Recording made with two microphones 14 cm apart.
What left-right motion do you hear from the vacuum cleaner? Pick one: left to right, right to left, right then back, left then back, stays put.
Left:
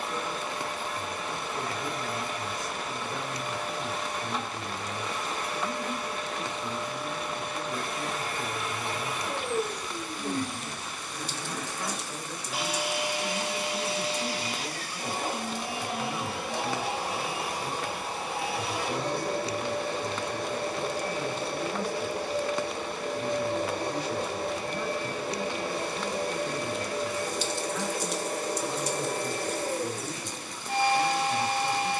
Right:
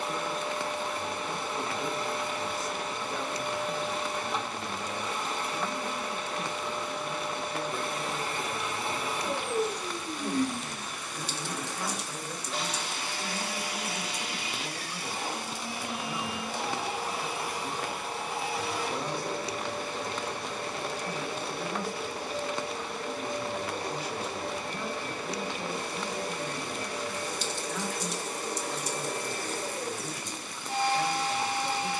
right to left.